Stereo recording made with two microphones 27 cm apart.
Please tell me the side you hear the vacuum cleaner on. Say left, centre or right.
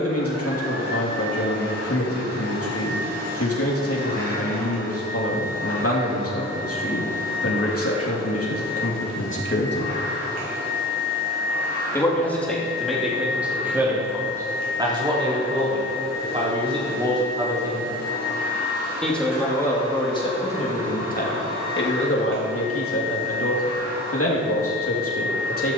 right.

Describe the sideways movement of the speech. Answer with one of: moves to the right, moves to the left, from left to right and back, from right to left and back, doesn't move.
from left to right and back.